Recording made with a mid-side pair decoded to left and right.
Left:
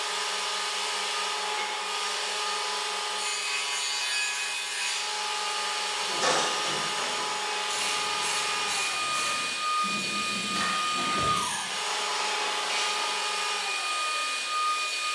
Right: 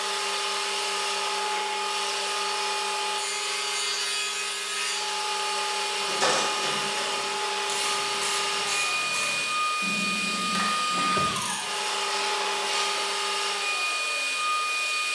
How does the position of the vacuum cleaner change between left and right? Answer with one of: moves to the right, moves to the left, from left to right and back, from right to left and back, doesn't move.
doesn't move.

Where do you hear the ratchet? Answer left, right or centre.
right.